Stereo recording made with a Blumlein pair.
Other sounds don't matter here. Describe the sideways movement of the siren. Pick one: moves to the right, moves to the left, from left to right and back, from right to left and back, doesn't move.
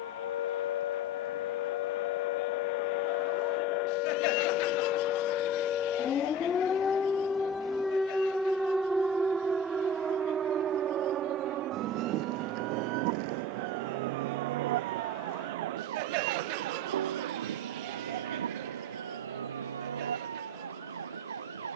moves to the right.